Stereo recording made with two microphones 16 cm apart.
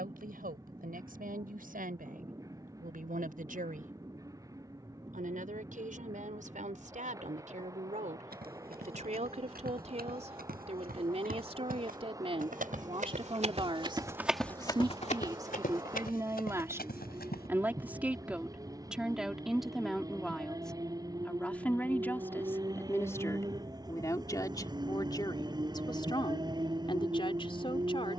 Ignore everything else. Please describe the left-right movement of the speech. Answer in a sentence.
You can hear the speech move to the left.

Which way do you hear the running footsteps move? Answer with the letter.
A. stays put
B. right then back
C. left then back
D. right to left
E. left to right
D.